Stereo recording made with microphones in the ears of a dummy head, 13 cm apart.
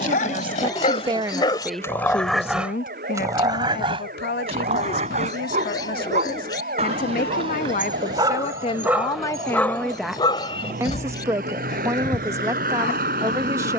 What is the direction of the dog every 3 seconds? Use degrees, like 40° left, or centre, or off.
30° left, 40° right, 40° right, 30° left, 70° left.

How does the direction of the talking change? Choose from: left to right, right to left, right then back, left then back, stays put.
left then back.